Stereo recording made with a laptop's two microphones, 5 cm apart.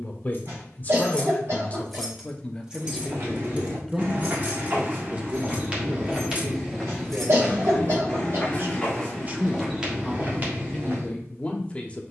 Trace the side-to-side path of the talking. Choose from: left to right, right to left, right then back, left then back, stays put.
right then back.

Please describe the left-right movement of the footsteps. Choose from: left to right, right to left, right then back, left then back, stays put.
left then back.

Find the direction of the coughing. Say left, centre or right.
right.